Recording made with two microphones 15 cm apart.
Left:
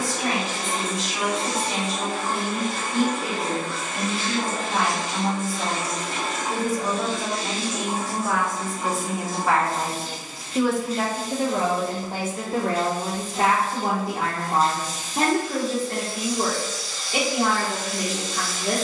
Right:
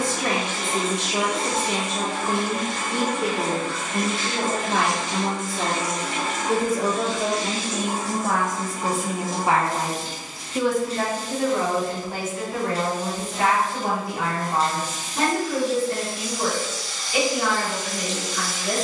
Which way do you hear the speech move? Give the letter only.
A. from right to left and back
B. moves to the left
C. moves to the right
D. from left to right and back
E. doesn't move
B.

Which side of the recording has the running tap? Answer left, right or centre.
right.